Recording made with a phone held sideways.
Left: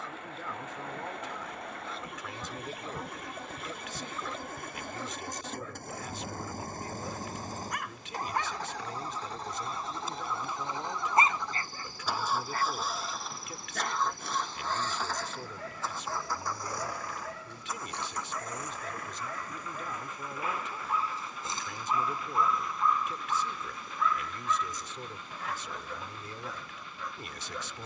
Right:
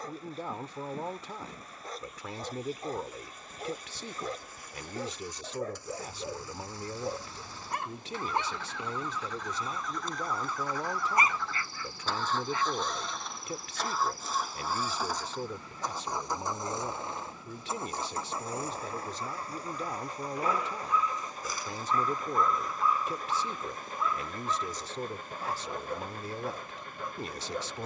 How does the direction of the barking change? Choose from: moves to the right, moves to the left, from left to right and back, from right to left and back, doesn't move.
from right to left and back.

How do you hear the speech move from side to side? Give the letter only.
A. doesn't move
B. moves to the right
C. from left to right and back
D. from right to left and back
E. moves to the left
A.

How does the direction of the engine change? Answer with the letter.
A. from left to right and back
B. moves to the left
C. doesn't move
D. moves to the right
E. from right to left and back
D.